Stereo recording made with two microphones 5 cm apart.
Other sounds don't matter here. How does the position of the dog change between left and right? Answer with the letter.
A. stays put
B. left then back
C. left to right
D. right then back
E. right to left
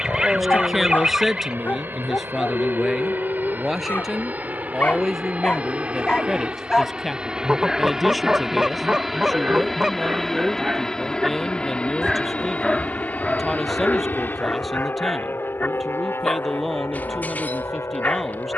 D.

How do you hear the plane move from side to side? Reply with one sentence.
In this clip you hear the plane move to the left.